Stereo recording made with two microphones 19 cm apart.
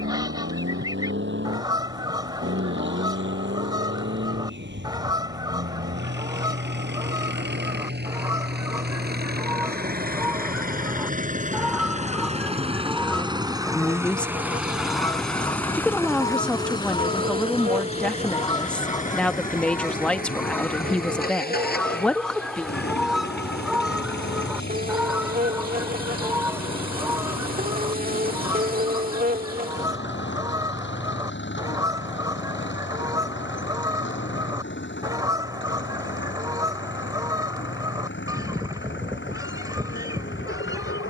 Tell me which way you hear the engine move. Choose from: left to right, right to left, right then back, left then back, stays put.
right to left.